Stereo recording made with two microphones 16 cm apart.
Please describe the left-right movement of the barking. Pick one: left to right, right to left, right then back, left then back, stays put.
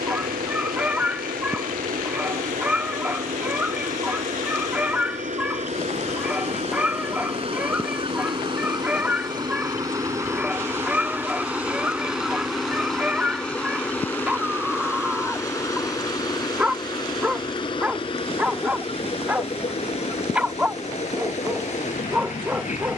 stays put.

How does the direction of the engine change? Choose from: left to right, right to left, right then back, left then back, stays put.
right to left.